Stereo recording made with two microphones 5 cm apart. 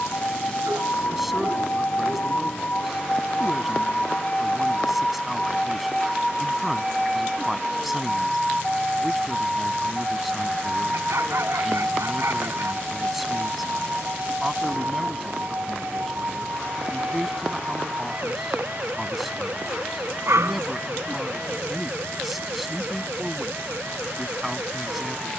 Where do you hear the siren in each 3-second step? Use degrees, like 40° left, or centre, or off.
40° left, 20° left, centre, 20° right, 40° right, 40° right, 50° right, 50° right, 60° right.